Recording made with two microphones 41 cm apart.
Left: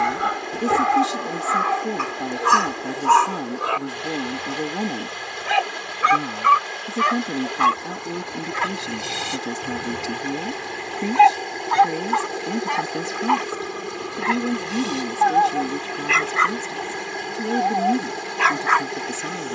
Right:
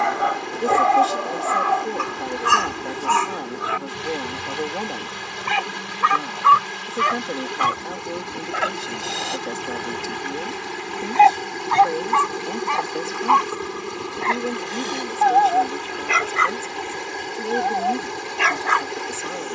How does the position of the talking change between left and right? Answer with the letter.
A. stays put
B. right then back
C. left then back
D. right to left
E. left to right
A.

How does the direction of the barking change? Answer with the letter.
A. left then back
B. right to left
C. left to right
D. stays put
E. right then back
A.